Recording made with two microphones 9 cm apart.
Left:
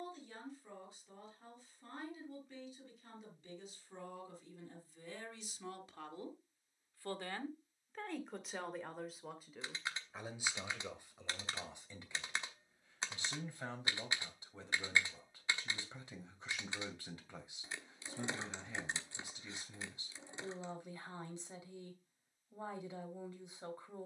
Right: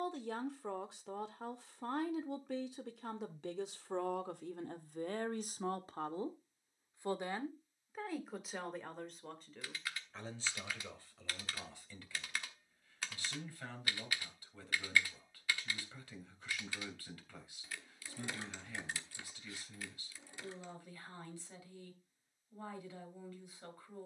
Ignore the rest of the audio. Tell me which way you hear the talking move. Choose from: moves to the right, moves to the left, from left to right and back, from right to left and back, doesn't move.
moves to the left.